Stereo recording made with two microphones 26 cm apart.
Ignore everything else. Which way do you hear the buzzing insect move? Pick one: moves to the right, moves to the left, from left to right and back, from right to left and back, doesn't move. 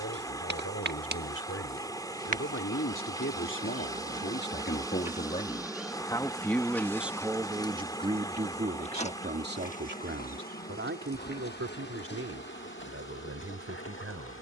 moves to the left.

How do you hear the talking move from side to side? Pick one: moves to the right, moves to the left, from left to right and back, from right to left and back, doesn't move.
moves to the right.